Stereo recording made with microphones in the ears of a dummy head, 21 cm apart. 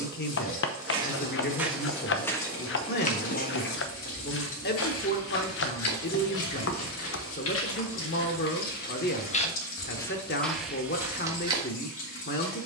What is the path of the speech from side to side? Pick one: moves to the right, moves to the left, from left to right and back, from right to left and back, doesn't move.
doesn't move.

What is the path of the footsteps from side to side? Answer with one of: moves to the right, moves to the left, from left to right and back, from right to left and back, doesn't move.
from right to left and back.